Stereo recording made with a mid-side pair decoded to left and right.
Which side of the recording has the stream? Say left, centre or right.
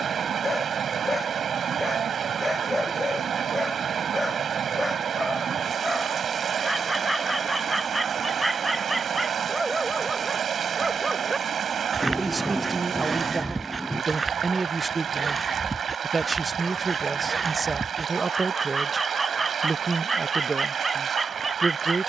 right.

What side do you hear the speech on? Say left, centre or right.
right.